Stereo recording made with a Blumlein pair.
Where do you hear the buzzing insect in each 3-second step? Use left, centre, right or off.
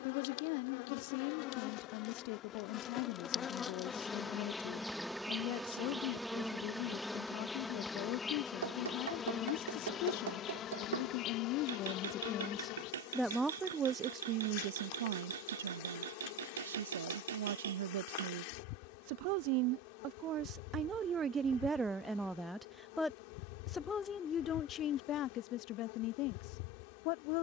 left, centre, centre, left, left, left, left, left, left.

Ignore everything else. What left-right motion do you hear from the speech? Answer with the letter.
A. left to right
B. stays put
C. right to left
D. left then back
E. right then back
E.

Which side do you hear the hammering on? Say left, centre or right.
right.